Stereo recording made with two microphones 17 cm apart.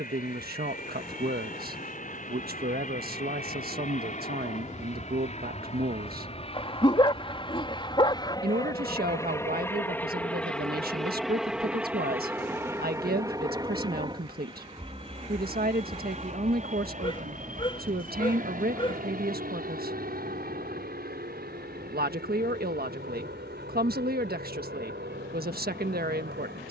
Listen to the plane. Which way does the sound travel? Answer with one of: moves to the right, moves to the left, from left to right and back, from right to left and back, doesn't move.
moves to the right.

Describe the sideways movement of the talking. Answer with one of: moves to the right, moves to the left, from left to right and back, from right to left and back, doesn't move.
doesn't move.